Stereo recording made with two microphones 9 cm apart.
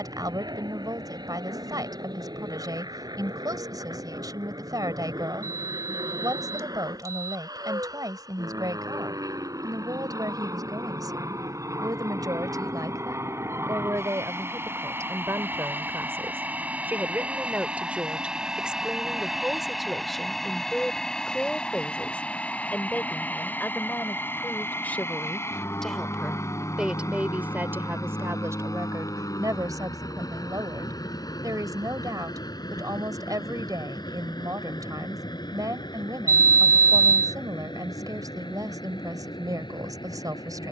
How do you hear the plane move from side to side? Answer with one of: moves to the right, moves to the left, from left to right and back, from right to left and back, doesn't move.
moves to the left.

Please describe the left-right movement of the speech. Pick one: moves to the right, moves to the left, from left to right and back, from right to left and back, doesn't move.
from right to left and back.